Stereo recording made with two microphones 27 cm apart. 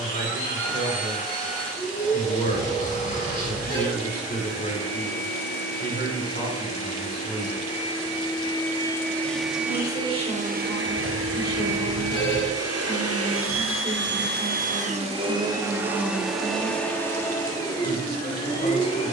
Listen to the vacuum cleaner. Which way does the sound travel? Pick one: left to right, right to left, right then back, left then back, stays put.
right then back.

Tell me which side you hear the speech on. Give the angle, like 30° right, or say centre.
30° left.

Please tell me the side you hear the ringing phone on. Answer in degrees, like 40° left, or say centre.
20° left.